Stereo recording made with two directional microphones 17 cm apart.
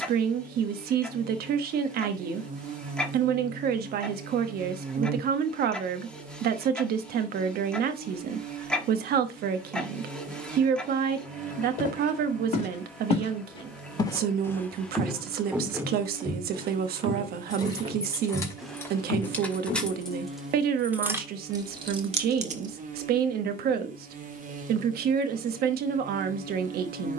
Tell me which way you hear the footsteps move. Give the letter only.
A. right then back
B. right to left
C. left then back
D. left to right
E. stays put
A.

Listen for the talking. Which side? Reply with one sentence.
You can hear the talking on the right.